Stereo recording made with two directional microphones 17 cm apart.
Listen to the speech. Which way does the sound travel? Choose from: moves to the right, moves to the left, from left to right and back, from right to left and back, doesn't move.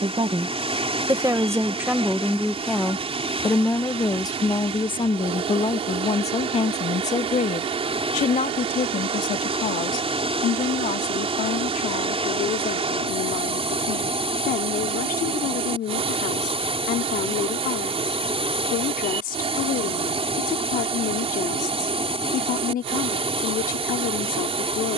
moves to the left.